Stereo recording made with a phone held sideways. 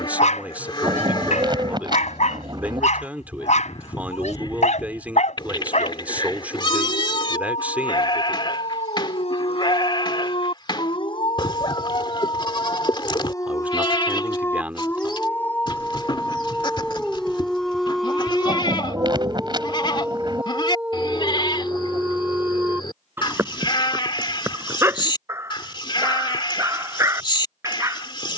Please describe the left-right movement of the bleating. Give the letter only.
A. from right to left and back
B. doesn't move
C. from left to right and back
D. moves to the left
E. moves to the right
B.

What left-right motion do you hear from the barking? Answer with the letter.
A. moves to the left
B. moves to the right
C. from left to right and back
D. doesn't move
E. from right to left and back
B.